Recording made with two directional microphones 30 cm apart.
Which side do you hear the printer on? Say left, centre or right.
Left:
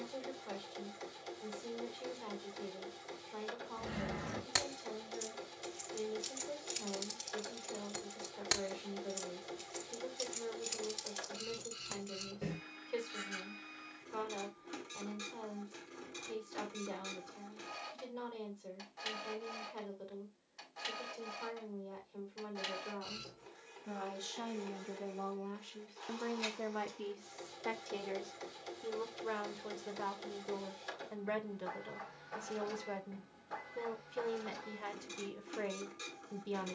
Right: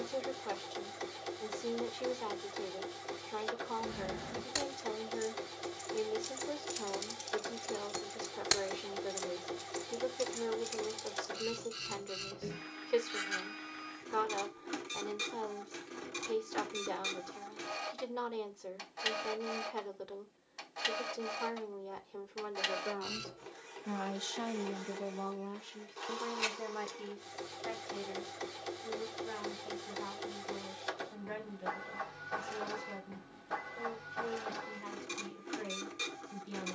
right.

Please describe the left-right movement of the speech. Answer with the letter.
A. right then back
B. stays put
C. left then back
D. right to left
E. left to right
D.